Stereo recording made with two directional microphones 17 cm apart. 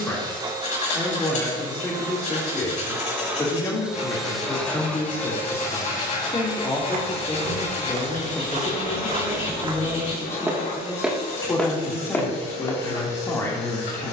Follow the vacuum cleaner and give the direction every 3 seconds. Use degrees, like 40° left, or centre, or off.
20° right, centre, 40° left, 60° left, 70° left.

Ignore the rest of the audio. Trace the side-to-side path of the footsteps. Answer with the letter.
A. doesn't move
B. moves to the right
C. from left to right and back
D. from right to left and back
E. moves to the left
E.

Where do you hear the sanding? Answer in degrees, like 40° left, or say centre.
50° left.